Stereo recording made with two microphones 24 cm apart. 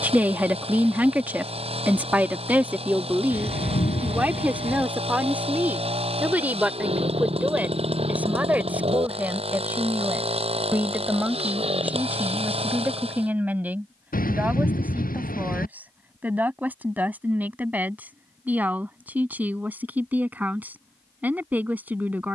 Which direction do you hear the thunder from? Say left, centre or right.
left.